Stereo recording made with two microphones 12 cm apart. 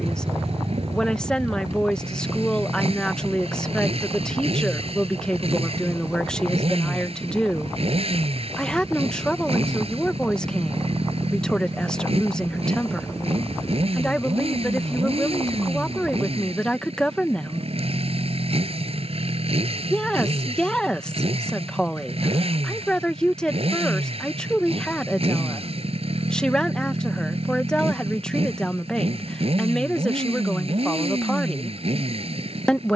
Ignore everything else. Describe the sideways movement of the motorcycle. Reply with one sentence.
In this clip you hear the motorcycle stay put.